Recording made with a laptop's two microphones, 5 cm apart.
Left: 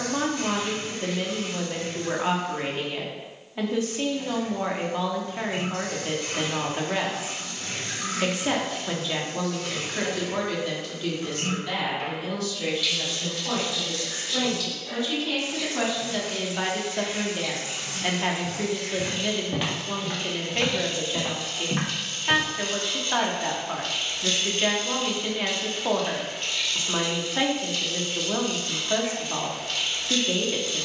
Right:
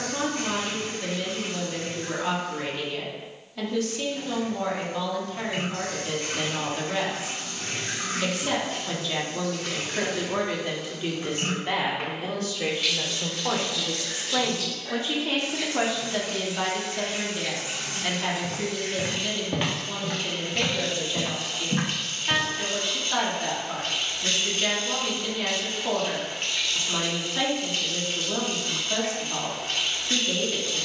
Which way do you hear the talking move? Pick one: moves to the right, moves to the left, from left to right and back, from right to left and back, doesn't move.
from left to right and back.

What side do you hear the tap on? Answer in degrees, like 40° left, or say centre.
40° right.